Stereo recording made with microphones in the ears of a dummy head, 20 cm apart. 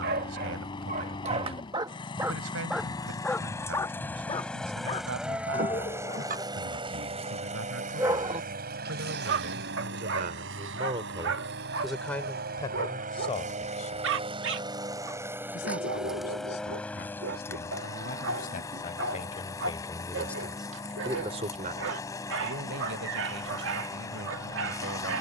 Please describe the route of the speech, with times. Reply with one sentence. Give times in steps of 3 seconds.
In this clip you hear the speech on the right from 0 s, on the left from 12 s and on the right from 21 s.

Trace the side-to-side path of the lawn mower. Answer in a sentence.
In this clip you hear the lawn mower go right and come back.